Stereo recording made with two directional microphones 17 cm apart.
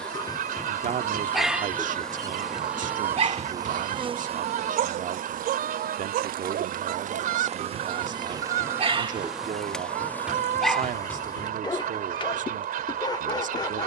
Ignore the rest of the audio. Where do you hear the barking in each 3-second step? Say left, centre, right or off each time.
centre, right, right, centre, left.